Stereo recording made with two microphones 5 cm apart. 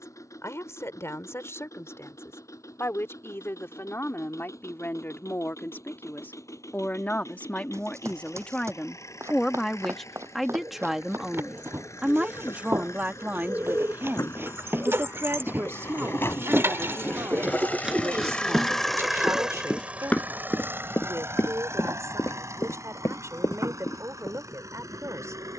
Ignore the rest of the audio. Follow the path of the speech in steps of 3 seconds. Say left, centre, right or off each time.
left, left, left, centre, right, right, right, right, right.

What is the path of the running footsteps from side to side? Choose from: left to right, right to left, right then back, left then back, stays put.
right to left.